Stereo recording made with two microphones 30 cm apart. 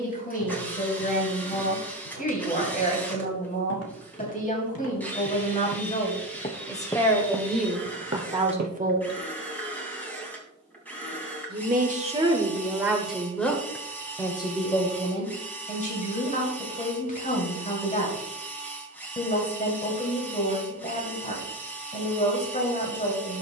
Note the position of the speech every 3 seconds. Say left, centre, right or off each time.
left, left, centre, right, centre, left, left, left.